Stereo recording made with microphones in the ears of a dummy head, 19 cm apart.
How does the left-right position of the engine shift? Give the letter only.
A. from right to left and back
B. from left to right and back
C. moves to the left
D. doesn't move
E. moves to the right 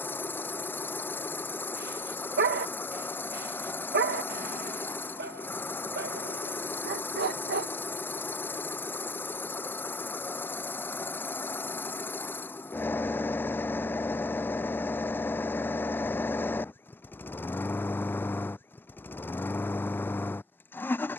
D.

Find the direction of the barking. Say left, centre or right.
right.